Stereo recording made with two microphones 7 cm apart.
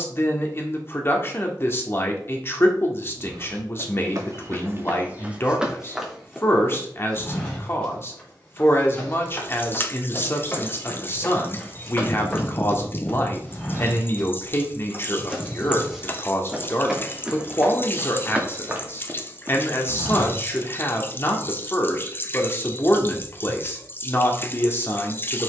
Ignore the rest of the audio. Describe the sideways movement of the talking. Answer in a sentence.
You can hear the talking stay in one place.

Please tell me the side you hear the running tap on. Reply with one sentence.
You can hear the running tap on the left.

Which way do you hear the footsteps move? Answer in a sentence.
You can hear the footsteps go left and come back.